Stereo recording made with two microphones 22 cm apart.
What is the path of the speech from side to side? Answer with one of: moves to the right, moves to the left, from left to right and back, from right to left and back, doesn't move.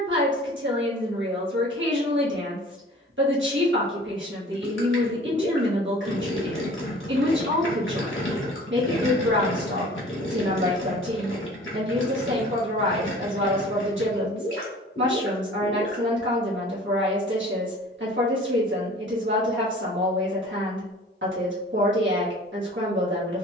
doesn't move.